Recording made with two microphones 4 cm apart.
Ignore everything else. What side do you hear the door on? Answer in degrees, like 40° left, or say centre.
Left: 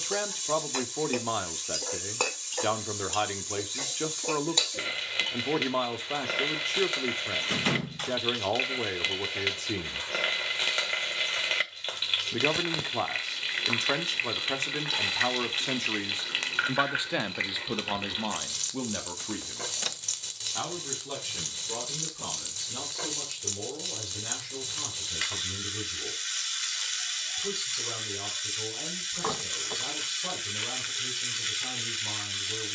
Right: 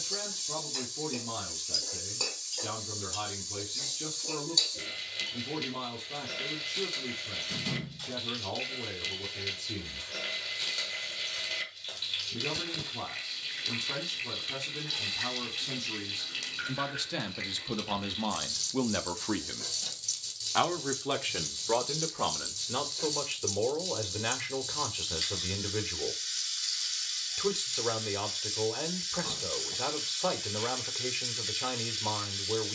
60° left.